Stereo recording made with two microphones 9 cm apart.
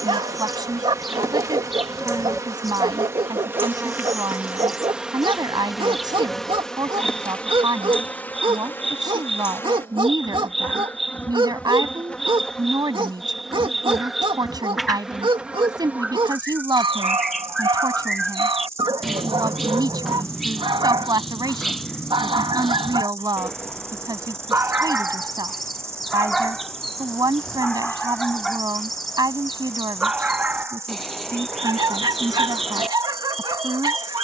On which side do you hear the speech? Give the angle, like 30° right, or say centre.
50° right.